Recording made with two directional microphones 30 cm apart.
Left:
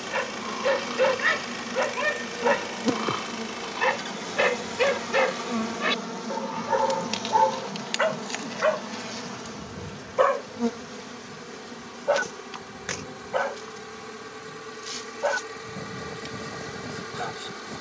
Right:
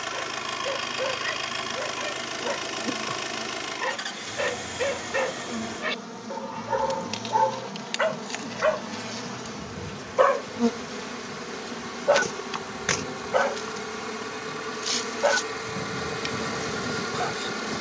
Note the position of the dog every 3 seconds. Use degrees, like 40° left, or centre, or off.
60° left, 40° left, 10° left, 10° right, 20° right, 20° right.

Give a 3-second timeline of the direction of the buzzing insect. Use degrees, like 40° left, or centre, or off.
50° left, 40° left, 10° left, 20° right, 40° right, 50° right.